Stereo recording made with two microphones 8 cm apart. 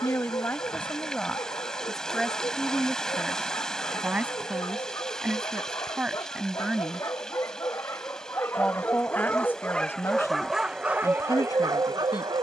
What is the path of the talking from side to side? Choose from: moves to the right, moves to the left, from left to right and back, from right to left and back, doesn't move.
from left to right and back.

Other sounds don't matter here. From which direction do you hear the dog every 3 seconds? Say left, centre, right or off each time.
left, left, left, centre.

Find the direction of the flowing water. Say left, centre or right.
centre.